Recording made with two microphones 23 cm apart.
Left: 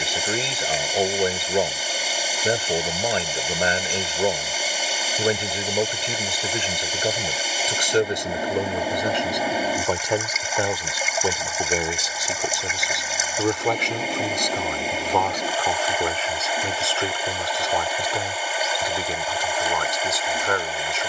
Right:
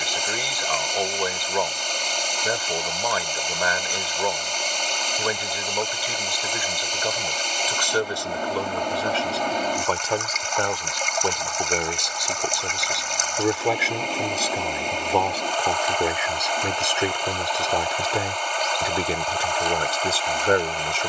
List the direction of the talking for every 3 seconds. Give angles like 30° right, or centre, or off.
30° left, 30° left, 20° left, 10° left, centre, 20° right, 30° right.